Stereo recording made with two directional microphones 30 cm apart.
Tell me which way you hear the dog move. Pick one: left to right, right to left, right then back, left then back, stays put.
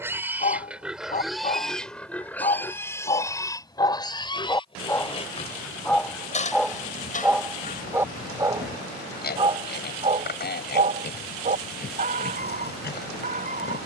left to right.